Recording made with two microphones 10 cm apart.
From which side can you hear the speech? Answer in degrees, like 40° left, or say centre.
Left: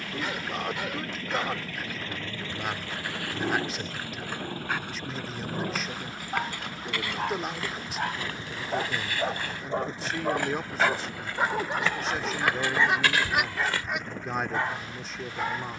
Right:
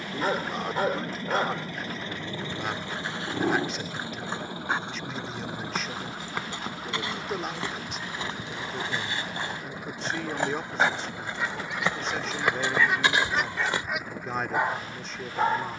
centre.